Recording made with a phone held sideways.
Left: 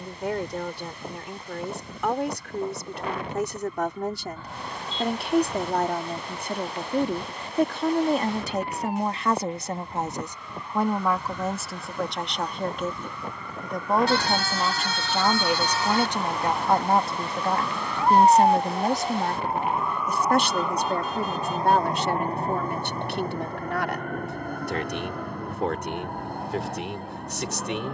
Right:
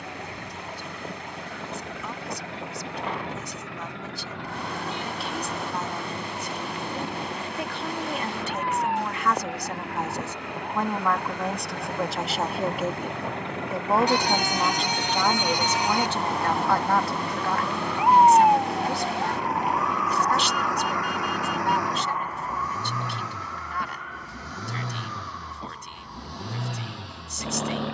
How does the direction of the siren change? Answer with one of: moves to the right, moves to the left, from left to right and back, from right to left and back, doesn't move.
moves to the left.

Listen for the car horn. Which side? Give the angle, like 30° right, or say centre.
20° right.